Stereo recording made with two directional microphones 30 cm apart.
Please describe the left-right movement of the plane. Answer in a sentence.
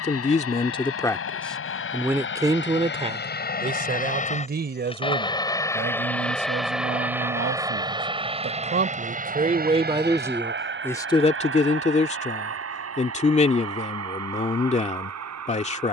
You can hear the plane travel towards the right.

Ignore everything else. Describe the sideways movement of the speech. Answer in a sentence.
You can hear the speech go right and come back.